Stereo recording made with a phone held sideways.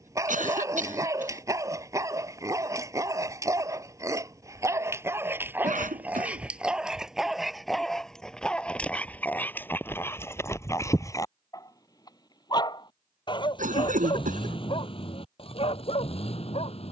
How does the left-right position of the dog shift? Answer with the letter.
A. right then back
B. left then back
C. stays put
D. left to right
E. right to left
E.